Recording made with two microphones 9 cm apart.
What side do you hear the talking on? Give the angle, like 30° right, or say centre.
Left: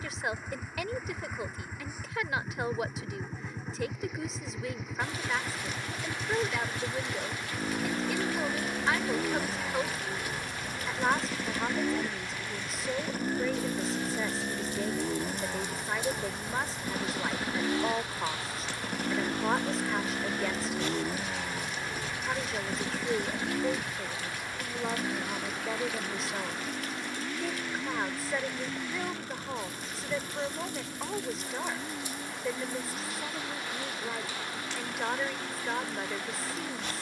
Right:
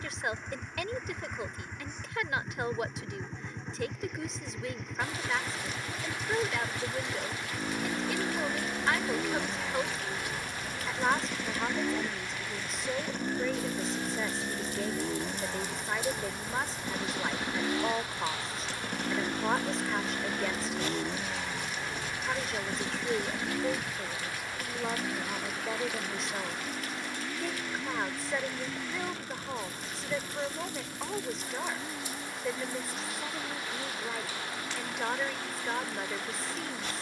centre.